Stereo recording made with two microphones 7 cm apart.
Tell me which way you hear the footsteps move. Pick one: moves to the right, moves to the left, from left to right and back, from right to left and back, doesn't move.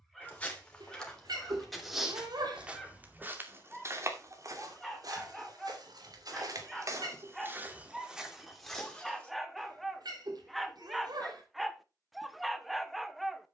from left to right and back.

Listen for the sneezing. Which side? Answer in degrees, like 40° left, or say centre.
70° right.